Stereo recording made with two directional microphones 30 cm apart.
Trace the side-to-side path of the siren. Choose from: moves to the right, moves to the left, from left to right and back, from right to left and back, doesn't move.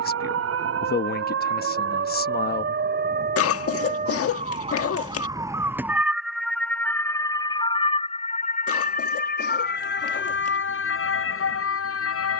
moves to the left.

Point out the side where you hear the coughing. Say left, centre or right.
left.